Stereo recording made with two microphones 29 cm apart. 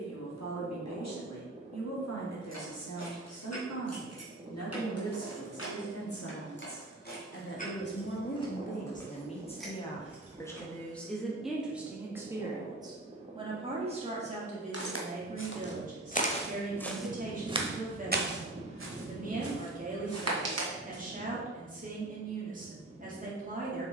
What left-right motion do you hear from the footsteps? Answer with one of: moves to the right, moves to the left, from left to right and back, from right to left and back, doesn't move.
moves to the right.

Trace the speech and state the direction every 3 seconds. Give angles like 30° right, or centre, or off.
70° left, 70° left, 40° left, 10° left, 20° right, 30° right, 30° right, 30° right.